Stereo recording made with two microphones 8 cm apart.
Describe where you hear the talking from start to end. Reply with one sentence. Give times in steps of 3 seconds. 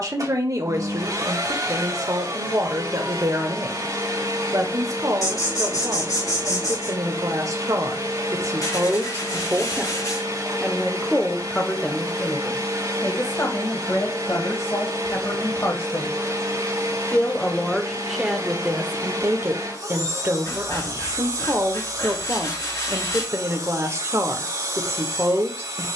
You can hear the talking on the right from 0 s, in the centre from 9 s, on the left from 12 s and on the right from 18 s.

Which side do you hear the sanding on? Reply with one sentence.
You can hear the sanding on the left.